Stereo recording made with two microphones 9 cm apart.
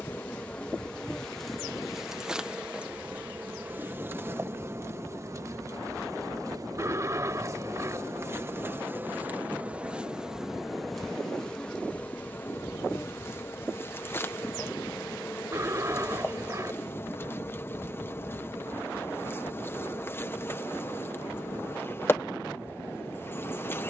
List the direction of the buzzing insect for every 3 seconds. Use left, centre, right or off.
centre, right, right, centre, left, left, left, left.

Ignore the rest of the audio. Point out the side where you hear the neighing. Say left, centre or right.
right.